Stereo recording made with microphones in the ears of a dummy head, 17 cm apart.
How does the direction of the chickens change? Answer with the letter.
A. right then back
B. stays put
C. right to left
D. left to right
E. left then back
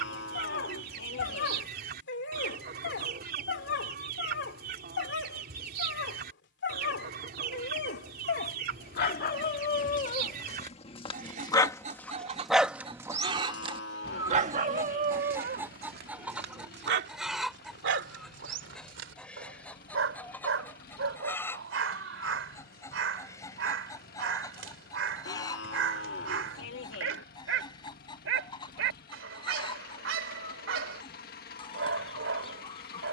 C.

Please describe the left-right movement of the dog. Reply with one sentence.
You can hear the dog move to the right.